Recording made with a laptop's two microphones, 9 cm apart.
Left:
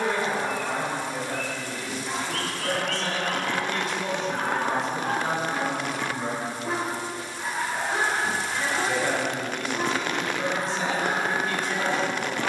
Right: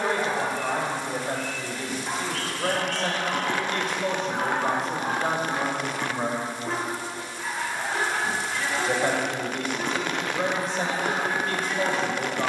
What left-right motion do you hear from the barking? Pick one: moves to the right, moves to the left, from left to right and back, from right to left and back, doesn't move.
moves to the left.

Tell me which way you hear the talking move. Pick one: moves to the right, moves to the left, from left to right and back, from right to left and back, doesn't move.
doesn't move.